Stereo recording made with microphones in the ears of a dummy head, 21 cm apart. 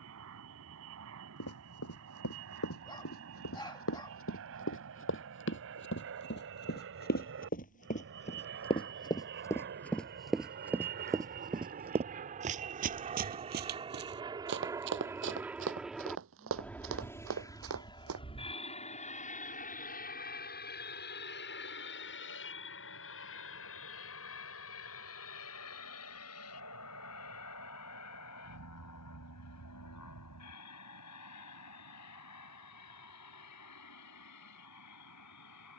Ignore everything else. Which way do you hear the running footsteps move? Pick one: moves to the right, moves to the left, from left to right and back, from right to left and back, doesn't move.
moves to the right.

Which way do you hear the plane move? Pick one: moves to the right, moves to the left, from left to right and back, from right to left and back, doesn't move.
moves to the left.